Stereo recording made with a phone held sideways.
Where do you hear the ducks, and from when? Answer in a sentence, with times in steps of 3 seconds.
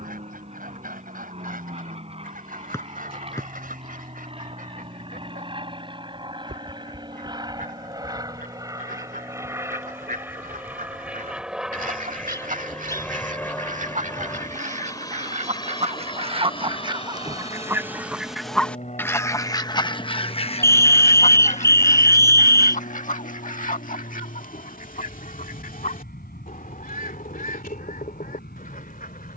In this clip you hear the ducks on the right from 0 s and on the left from 18 s.